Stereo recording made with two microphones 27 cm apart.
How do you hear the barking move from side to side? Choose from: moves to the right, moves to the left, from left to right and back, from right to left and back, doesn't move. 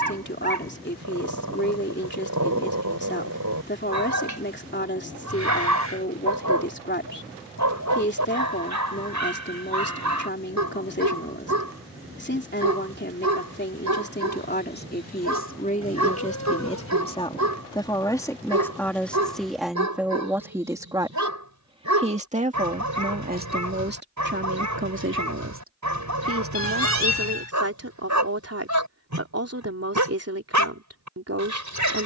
doesn't move.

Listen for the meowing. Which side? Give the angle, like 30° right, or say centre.
70° left.